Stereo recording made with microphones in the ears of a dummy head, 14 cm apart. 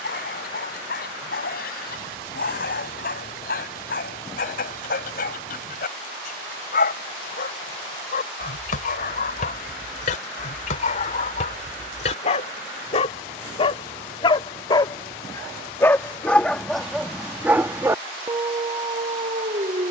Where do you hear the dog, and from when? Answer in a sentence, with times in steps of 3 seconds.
In this clip you hear the dog on the left from 0 s, in the centre from 15 s and on the right from 18 s.